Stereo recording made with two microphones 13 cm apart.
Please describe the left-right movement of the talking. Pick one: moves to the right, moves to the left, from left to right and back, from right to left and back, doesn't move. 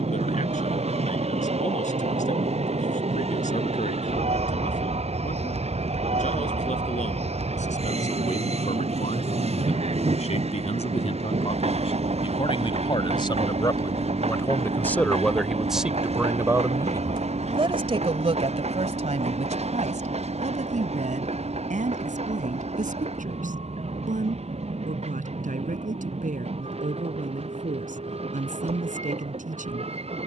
moves to the right.